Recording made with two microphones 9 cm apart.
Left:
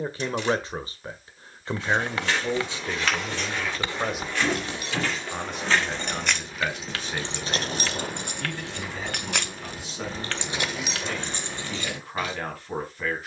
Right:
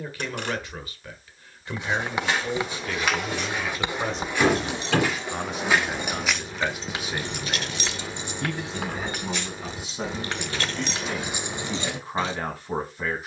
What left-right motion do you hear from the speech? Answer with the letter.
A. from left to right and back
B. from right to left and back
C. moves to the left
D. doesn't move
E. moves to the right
E.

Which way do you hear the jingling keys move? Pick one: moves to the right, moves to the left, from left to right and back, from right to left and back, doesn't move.
from right to left and back.